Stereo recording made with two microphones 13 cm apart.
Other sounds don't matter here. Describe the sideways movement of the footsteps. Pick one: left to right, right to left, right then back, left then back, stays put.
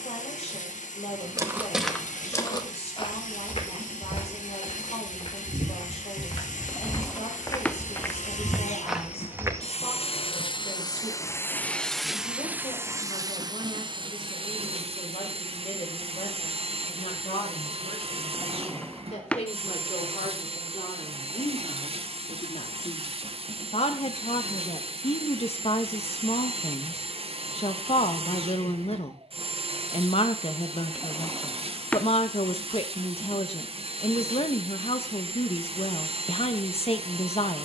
left then back.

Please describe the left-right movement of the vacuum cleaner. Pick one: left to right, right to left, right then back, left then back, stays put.
left to right.